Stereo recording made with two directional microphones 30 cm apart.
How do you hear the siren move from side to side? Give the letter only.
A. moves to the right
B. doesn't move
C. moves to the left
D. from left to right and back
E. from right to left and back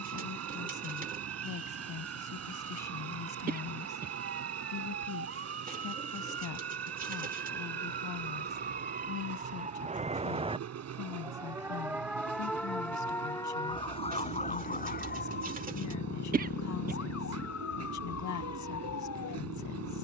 C.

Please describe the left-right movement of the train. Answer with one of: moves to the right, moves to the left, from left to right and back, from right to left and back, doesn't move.
doesn't move.